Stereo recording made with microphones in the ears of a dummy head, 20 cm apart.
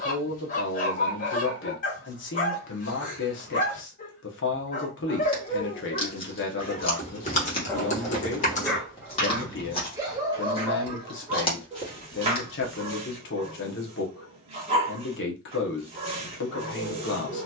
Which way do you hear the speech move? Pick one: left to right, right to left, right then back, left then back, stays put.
stays put.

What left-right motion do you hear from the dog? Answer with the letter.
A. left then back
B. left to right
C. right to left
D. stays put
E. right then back
B.